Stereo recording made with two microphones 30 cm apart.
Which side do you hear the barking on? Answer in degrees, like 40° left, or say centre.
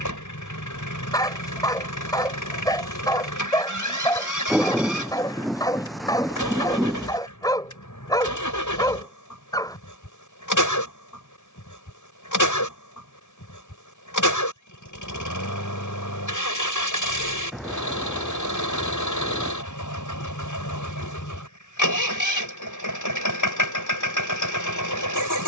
10° left.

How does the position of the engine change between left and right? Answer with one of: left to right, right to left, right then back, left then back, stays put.
stays put.